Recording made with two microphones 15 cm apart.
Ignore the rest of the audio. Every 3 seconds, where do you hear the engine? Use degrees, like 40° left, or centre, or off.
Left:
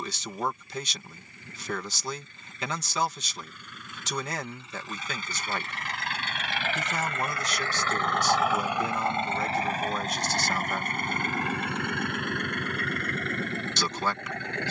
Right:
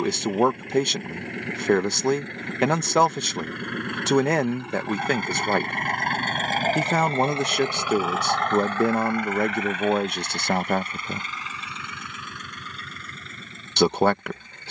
80° right, 70° right, 20° right, 40° left, 70° left.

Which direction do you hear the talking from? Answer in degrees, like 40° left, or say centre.
60° right.